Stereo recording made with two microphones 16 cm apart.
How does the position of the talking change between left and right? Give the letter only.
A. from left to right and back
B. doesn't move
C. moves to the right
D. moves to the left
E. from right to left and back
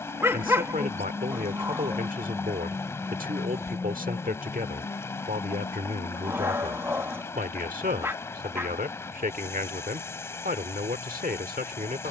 B.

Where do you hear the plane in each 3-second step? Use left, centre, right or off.
right, left, left, left.